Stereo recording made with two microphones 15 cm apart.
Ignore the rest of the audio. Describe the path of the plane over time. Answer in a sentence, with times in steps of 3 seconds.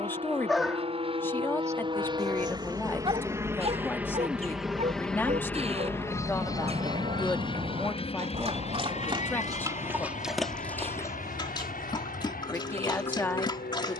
You can hear the plane on the right from 0 s, in the centre from 3 s and on the left from 6 s.